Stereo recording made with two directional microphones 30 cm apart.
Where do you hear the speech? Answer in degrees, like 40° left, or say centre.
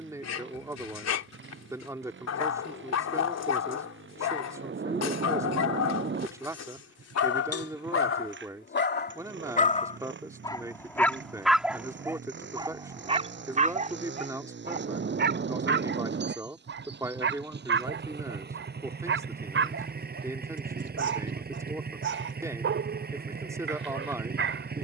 10° right.